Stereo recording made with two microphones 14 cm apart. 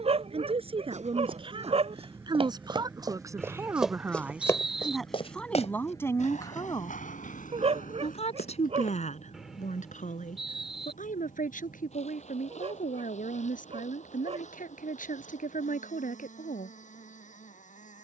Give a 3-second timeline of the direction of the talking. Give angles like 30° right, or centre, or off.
40° right, 10° right, 40° left, 70° left, 70° left, 70° left.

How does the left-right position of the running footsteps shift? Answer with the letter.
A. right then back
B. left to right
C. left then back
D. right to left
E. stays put
D.